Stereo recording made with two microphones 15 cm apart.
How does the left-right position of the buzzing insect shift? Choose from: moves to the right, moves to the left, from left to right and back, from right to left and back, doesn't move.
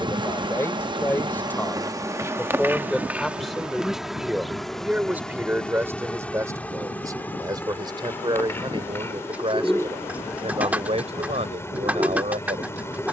moves to the left.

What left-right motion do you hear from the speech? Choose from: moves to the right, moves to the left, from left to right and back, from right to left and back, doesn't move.
moves to the right.